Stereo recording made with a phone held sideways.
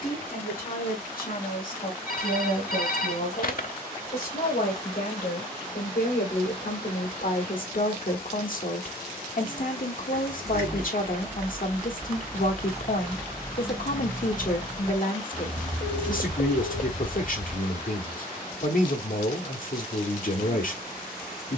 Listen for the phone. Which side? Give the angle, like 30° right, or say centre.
60° left.